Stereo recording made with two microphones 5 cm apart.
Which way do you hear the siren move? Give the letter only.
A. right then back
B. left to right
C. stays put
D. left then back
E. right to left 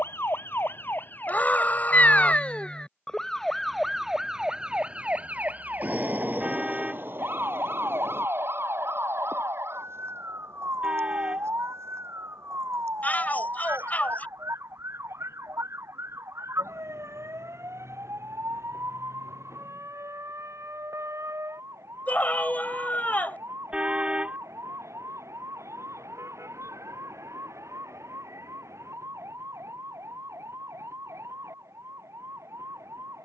B.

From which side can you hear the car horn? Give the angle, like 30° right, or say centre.
20° right.